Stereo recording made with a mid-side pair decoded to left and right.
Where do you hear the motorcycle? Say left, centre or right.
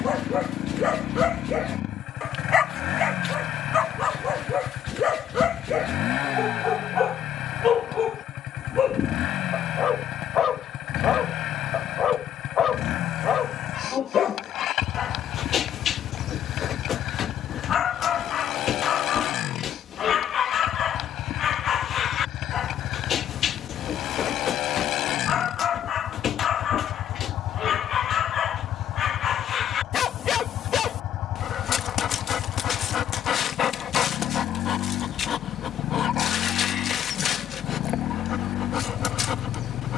left.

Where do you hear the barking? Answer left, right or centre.
left.